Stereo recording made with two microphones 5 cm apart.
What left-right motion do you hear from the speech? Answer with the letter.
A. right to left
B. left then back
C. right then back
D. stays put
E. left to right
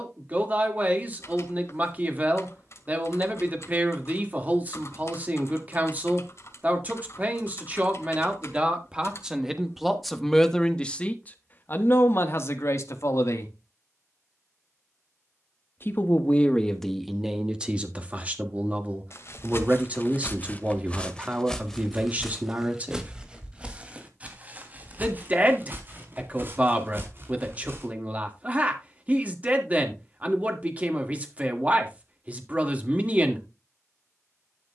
B.